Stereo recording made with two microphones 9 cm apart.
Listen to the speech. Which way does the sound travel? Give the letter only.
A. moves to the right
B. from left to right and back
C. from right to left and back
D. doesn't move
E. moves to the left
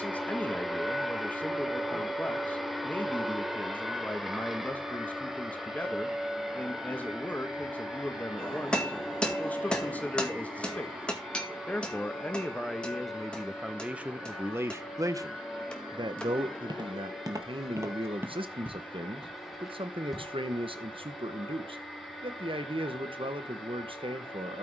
A.